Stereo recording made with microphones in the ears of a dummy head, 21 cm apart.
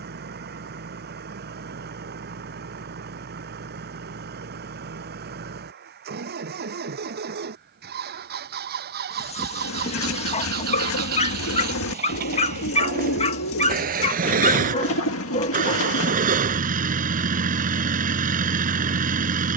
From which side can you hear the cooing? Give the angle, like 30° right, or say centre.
60° left.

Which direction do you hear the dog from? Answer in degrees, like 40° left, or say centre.
30° left.